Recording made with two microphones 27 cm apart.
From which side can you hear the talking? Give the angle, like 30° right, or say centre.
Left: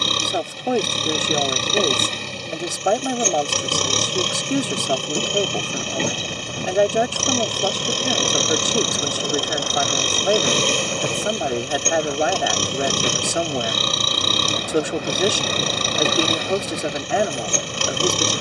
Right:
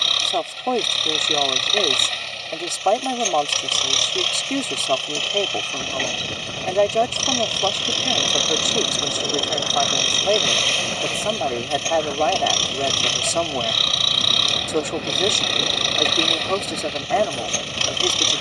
10° left.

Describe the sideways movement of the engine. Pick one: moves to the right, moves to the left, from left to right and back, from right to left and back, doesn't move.
doesn't move.